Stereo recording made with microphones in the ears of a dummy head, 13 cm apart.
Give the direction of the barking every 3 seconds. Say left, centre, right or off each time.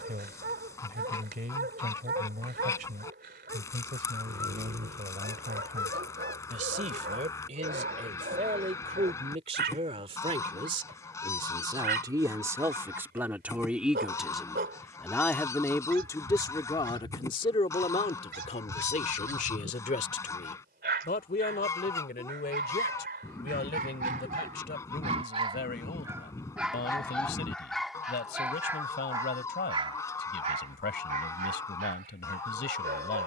right, right, right, right, right, right, right, right, right, centre, right.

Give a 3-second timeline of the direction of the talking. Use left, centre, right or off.
right, right, right, right, centre, left, left, left, left, left, left.